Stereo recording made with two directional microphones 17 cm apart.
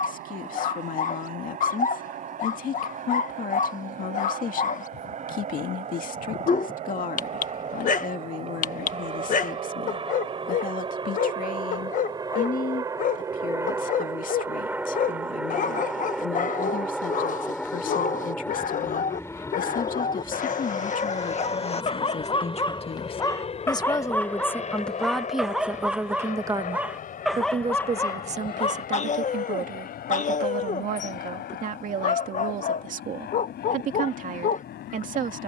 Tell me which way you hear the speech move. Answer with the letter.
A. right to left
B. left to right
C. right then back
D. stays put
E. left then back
B.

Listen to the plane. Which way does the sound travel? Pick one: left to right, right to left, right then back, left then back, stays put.
right to left.